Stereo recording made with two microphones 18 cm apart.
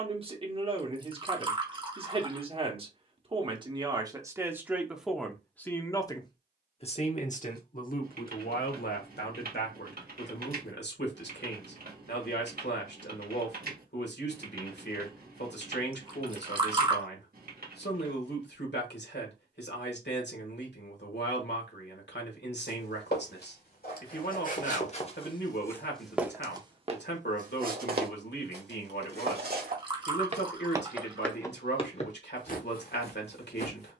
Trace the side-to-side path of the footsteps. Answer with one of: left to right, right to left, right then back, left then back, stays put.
right then back.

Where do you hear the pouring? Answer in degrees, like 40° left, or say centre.
30° right.